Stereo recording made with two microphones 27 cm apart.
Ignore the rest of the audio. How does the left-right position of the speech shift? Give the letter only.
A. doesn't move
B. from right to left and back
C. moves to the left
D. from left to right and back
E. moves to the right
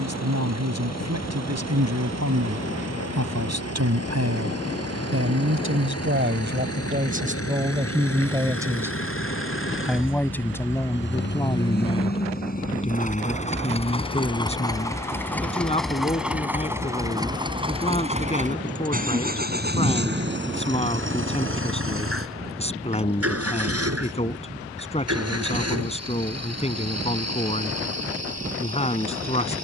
C.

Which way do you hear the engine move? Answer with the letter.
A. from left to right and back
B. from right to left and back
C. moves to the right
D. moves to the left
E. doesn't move
C.